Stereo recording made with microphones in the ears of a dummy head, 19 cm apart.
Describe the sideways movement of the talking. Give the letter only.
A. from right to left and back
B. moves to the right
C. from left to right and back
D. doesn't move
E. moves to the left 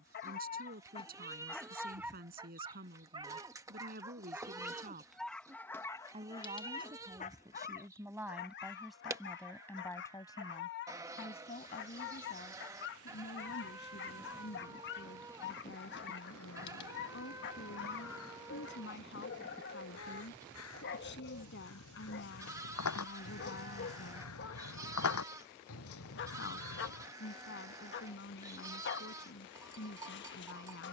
E.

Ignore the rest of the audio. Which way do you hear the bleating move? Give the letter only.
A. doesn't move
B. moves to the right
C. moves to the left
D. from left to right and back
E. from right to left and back
A.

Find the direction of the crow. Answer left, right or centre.
left.